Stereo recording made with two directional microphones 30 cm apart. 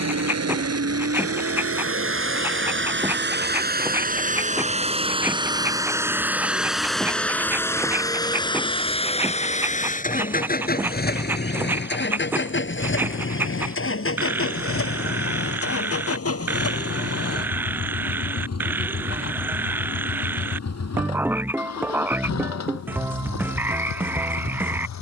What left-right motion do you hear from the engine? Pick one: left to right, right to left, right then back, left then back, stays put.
right to left.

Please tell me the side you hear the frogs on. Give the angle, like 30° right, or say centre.
10° right.